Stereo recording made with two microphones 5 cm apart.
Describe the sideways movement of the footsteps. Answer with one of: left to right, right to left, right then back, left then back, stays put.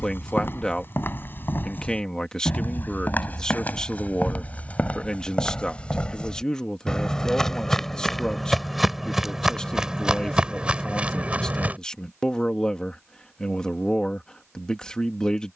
left to right.